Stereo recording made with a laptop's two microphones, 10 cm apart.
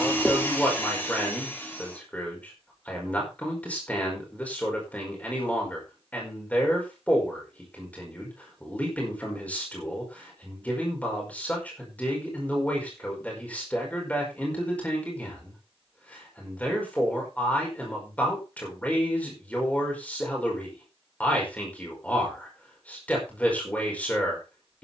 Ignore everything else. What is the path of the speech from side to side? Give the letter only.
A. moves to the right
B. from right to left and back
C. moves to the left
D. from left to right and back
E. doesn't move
E.